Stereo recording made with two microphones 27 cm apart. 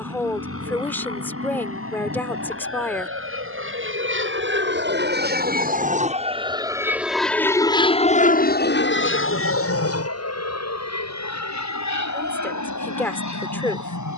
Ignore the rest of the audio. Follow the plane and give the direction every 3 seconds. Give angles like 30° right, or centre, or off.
70° right, 50° right, 10° left, 60° left, 70° left.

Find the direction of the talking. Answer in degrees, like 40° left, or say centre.
10° left.